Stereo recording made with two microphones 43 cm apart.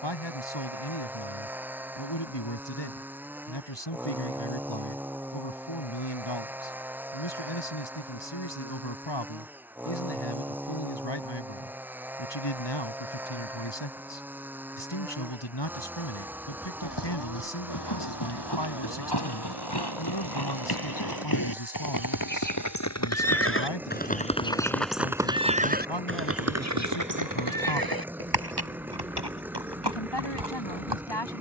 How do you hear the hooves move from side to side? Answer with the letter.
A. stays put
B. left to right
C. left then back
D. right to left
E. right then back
B.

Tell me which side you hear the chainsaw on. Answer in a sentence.
You can hear the chainsaw in the centre.